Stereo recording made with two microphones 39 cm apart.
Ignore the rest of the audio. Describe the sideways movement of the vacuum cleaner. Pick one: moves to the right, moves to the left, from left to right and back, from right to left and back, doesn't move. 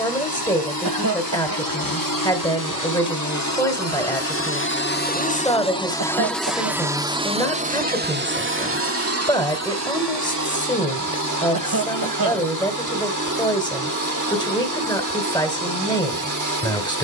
moves to the right.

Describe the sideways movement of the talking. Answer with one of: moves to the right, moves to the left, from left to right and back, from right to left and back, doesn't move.
doesn't move.